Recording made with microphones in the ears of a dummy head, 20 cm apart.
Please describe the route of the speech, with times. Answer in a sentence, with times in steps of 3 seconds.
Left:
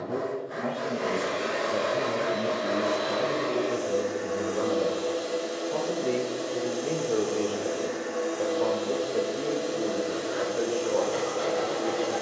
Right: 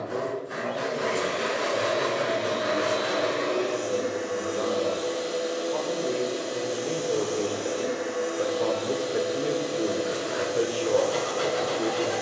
You can hear the speech on the left from 0 s, in the centre from 6 s and on the right from 9 s.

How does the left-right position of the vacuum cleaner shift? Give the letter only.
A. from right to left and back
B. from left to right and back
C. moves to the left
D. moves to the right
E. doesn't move
E.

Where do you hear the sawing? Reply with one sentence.
In this clip you hear the sawing on the right.